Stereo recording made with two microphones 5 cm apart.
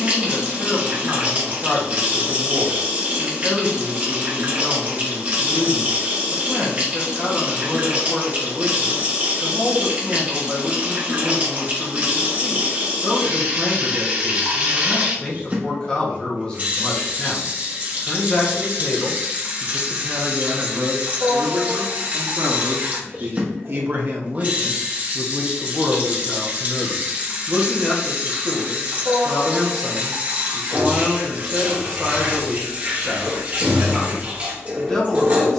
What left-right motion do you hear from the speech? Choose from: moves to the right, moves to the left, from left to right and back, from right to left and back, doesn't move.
from left to right and back.